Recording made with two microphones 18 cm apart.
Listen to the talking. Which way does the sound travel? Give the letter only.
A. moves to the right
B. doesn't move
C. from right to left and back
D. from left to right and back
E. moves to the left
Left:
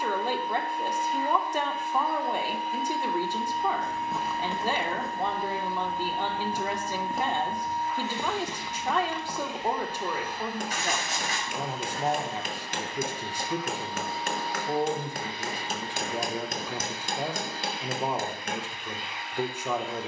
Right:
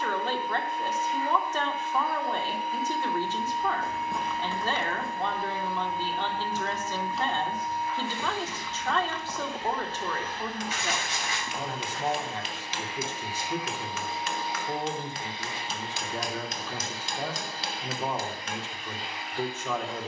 B.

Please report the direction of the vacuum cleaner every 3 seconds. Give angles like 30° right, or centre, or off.
30° left, 30° left, 20° left, 10° left, 10° right, 40° right, 40° right.